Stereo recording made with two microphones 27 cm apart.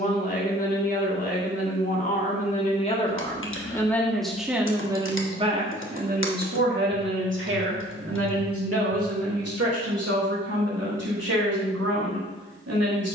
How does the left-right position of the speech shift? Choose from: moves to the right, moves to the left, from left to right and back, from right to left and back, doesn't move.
moves to the right.